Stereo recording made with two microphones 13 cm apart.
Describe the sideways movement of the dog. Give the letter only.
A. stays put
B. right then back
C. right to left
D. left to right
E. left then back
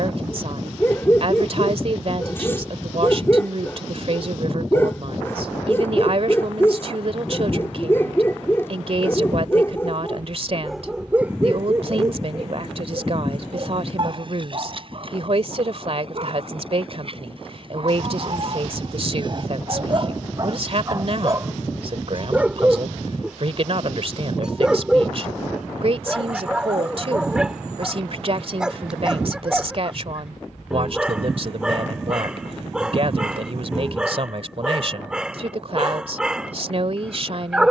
B.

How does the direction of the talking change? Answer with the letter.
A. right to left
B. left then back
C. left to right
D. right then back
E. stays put
E.